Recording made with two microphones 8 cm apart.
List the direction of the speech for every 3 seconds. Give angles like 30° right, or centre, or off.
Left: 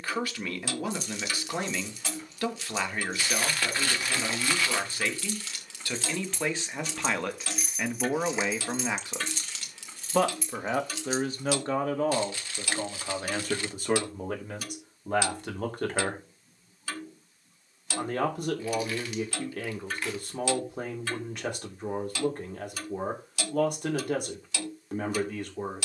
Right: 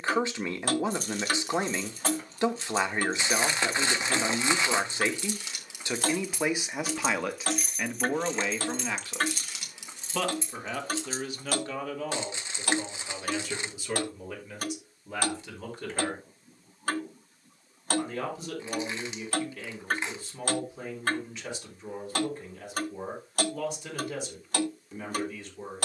20° right, 20° right, centre, 30° left, 50° left, 50° left, 60° left, 60° left, 60° left.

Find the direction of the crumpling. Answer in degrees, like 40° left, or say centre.
20° right.